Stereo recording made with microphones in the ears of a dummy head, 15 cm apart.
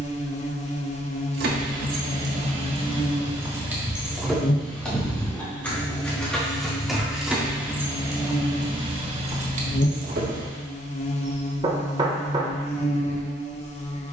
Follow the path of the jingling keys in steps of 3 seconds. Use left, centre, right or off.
right, centre, centre, right, off.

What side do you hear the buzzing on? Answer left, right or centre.
left.